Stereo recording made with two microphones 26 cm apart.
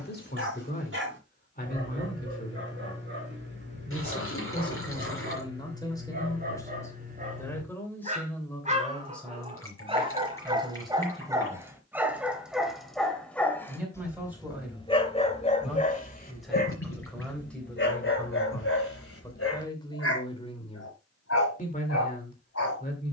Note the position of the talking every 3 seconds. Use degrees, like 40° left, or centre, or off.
30° left, 20° left, 10° left, centre, 10° right, centre, 20° left, 30° left.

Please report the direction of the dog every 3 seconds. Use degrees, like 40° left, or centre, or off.
50° right, 40° right, 30° right, 20° right, 10° left, 40° left, 60° left, 70° left.